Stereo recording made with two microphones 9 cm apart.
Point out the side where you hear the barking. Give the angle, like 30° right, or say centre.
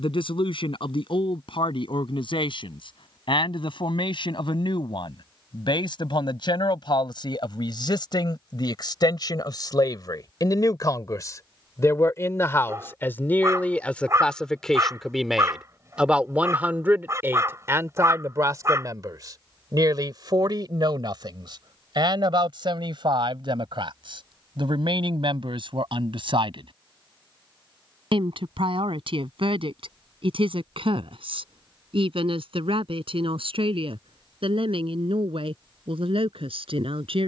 30° right.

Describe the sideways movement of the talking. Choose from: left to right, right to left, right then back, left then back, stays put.
left to right.